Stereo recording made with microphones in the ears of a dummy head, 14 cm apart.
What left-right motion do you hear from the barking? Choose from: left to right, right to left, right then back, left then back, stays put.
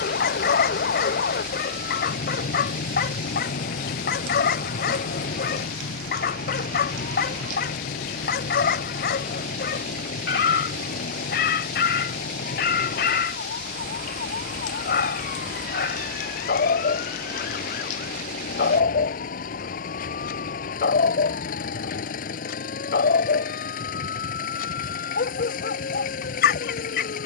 stays put.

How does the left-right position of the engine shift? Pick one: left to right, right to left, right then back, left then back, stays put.
stays put.